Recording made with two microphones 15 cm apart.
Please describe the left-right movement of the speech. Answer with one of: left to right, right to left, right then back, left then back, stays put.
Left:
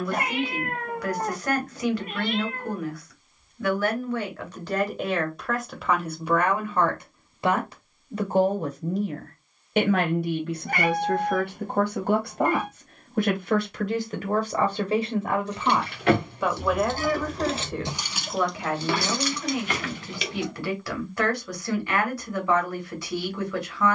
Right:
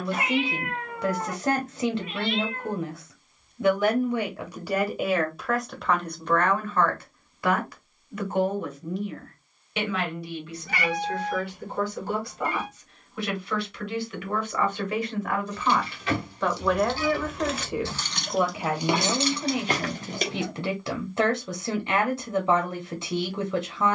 left then back.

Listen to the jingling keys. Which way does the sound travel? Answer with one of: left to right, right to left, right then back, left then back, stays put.
left to right.